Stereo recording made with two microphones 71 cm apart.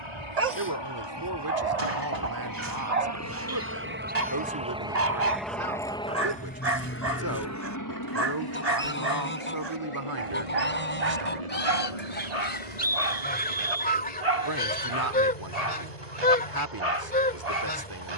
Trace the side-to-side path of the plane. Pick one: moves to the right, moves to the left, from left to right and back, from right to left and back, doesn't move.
moves to the left.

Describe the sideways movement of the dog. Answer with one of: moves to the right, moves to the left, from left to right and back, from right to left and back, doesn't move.
doesn't move.